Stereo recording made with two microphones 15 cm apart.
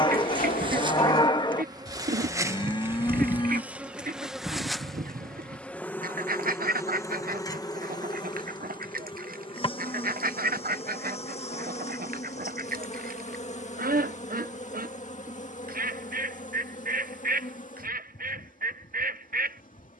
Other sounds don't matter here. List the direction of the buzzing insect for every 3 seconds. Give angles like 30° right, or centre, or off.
30° right, centre, 20° left, 40° left, 50° left, 60° left, 70° left.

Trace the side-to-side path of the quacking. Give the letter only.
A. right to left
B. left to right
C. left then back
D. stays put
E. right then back
D.